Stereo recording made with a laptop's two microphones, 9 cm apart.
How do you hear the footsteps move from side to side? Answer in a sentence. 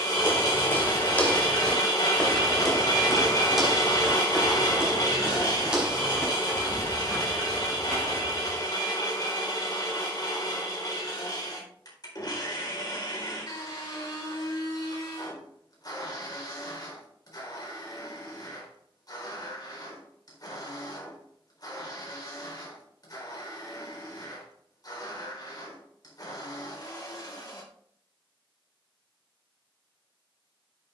You can hear the footsteps move from left to right.